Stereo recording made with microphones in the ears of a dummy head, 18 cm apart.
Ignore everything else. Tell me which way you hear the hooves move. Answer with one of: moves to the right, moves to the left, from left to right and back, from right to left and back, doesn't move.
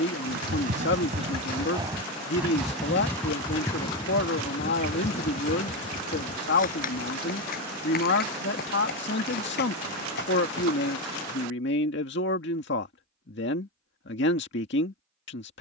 moves to the left.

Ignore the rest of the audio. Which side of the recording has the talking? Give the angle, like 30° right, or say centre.
60° left.